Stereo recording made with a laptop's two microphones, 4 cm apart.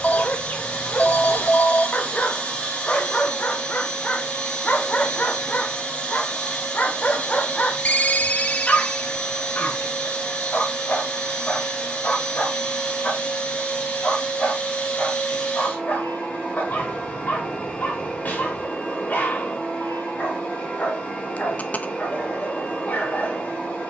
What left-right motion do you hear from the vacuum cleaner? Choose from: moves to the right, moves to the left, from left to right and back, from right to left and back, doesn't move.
doesn't move.